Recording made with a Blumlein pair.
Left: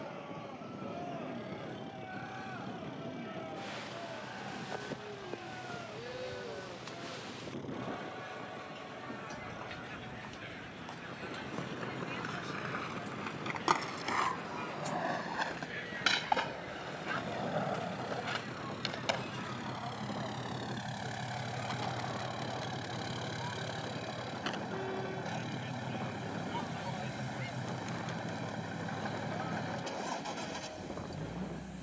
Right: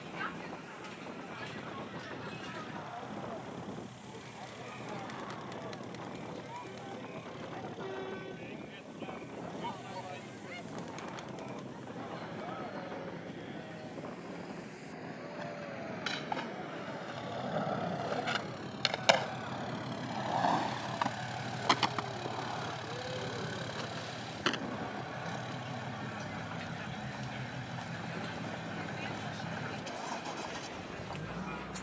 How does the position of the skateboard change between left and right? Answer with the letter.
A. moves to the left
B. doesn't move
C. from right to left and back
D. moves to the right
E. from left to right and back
D.